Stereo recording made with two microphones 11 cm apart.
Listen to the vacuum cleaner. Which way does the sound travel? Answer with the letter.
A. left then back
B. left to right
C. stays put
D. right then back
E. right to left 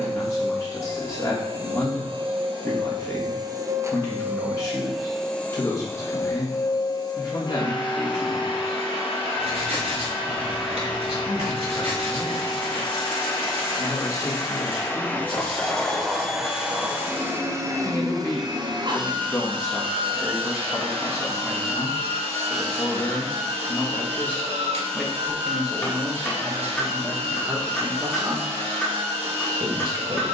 A.